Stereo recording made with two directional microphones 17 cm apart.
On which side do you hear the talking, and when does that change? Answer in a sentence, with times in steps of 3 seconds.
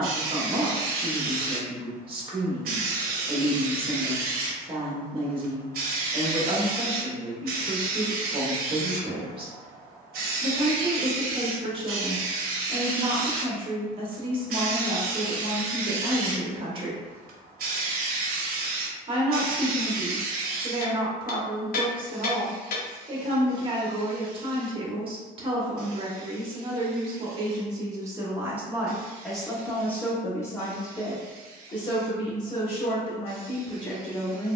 You can hear the talking on the right from 0 s, in the centre from 27 s and on the left from 30 s.